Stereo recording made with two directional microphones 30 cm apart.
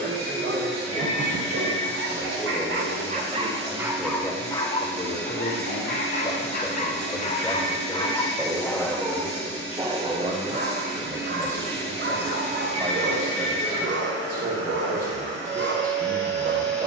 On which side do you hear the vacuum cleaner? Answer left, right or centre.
right.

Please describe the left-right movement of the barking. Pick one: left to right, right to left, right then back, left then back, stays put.
left then back.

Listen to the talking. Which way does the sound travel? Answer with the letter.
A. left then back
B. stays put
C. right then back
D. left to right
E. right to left
A.